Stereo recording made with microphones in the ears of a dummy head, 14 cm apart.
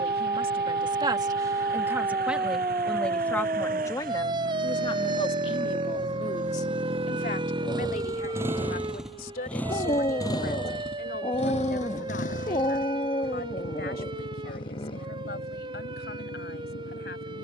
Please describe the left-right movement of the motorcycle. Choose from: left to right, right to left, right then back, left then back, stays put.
right to left.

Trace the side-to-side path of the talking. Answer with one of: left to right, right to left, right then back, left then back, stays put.
right to left.